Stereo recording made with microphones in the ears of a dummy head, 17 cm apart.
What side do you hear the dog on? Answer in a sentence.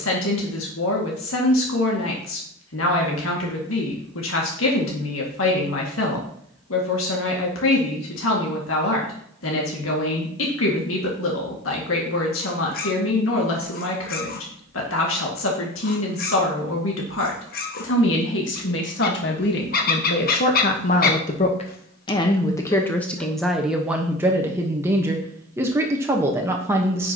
You can hear the dog on the left.